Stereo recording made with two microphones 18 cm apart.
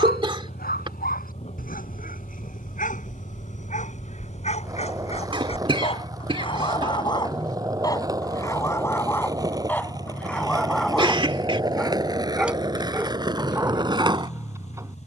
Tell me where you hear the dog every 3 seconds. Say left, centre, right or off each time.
left, left, left, centre, centre.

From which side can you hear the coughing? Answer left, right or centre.
right.